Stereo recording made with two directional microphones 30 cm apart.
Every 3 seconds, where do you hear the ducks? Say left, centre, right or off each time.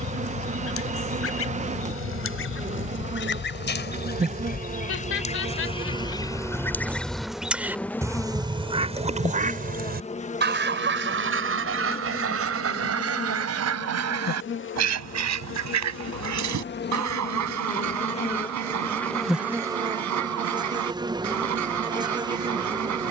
left, left, centre, right, right, right, right, right.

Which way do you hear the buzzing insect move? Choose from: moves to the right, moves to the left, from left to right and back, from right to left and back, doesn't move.
from right to left and back.